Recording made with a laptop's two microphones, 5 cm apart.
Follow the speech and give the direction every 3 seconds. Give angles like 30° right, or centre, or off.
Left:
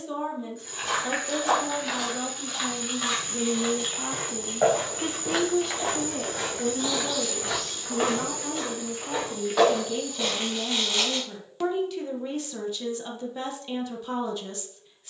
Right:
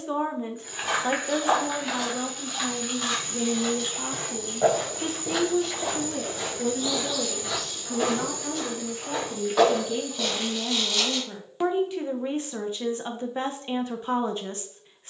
20° right, 10° left, centre, 10° right, 30° right.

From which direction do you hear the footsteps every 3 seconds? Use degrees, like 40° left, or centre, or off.
10° right, 30° left, 50° left, centre, off.